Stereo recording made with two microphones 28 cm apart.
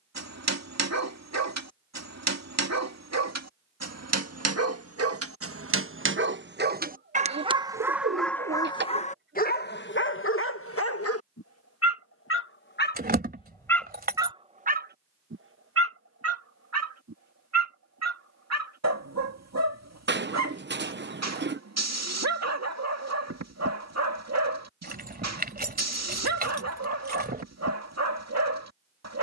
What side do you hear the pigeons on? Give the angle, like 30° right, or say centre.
40° right.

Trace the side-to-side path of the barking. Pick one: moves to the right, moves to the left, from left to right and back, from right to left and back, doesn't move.
from right to left and back.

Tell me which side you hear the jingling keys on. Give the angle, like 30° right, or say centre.
30° right.